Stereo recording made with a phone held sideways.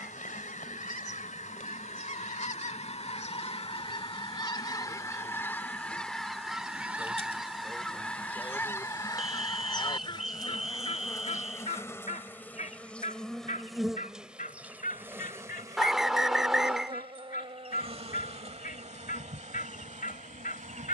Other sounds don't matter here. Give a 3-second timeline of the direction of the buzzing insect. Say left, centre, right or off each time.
left, left, left, left, centre, right, right.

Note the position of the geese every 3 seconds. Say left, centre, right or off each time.
left, left, centre, left, left, left, left.